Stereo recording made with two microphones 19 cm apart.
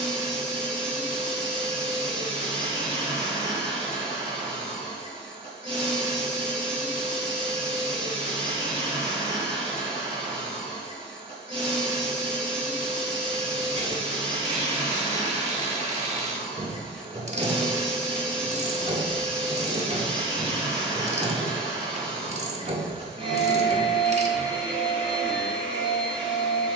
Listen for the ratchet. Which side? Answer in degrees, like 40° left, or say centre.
30° right.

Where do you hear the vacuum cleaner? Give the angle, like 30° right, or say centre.
30° right.